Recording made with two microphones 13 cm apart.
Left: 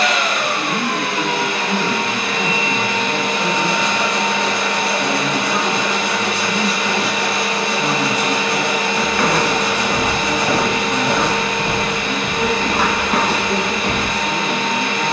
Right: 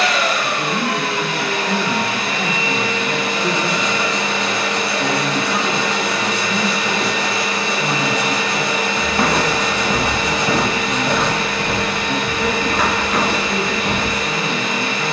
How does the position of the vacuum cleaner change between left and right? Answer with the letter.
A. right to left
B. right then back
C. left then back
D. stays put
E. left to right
D.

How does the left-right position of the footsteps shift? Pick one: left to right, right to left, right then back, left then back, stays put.
right to left.